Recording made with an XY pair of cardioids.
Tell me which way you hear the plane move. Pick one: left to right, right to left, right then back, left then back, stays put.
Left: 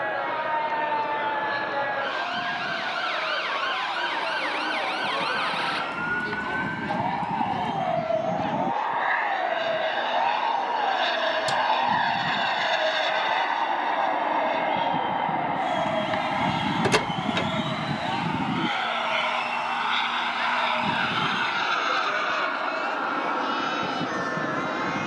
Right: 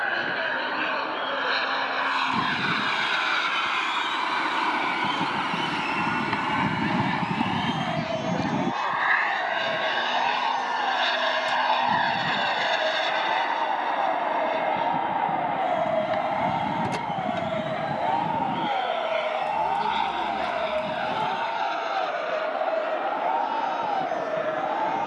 right to left.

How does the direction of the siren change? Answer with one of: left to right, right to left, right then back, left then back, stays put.
left to right.